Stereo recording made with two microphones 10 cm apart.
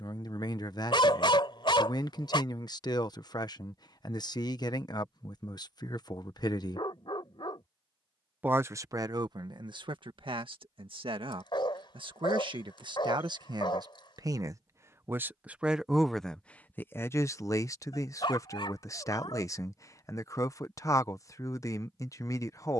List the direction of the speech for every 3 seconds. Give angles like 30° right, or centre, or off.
50° left, 50° left, 10° left, 60° right, 50° right, 10° left, 30° left, 30° left.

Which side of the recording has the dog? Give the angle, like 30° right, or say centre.
60° left.